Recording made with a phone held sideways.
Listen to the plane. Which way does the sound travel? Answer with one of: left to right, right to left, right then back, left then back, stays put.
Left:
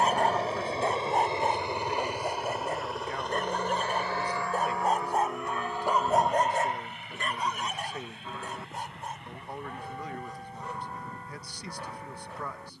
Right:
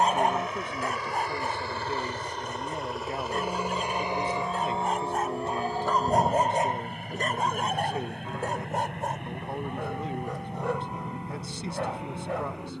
left to right.